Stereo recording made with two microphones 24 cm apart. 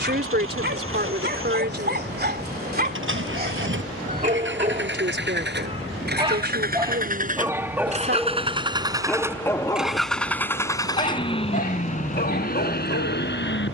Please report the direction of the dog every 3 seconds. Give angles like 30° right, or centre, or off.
40° right, 30° right, 10° right, 20° left, 50° left.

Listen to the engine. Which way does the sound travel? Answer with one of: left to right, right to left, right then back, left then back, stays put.
right to left.